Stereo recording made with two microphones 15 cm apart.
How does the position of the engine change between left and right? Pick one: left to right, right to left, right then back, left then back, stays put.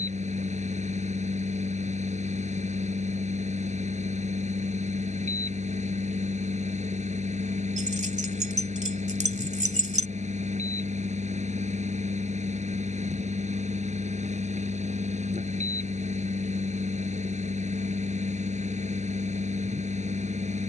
stays put.